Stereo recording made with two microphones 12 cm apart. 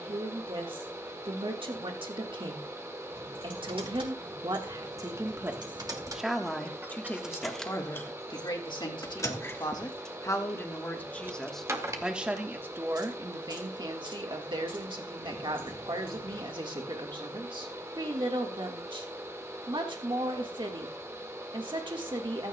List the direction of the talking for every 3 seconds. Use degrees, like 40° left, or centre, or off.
40° right, 30° right, 20° left, 20° left, 30° right, 40° right, 40° right, 40° right.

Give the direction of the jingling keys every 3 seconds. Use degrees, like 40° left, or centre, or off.
off, 40° right, centre, centre, 40° right, 50° right, off, off.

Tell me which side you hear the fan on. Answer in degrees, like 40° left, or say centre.
20° right.